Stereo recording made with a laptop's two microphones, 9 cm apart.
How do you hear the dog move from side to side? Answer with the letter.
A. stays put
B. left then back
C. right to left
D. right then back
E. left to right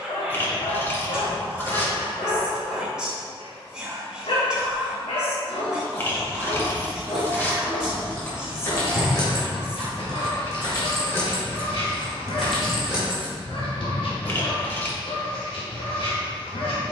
A.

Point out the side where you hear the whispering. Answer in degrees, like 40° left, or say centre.
10° right.